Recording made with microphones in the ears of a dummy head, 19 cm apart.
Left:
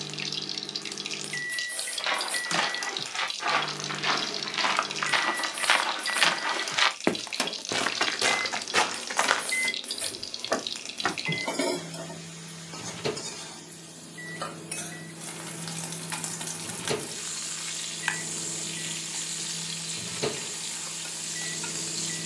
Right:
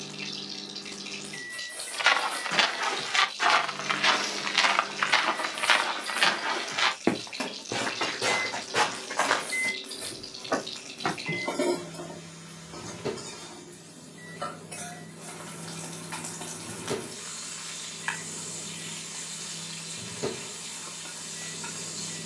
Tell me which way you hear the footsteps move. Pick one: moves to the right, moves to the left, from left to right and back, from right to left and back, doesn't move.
moves to the left.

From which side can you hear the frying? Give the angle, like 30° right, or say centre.
60° left.